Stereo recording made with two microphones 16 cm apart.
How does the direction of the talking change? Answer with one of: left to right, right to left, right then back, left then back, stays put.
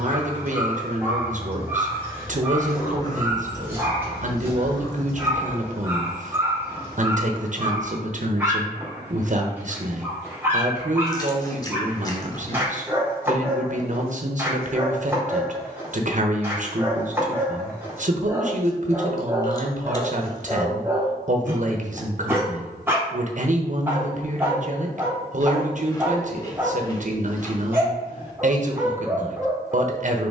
stays put.